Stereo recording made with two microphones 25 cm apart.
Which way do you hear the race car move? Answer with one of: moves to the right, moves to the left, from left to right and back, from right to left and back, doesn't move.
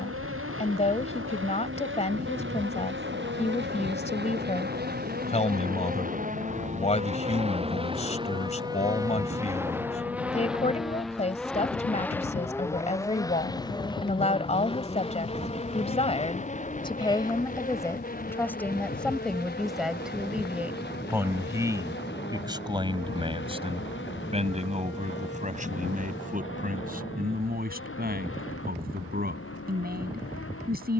moves to the left.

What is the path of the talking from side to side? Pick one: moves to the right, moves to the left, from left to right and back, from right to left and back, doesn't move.
moves to the right.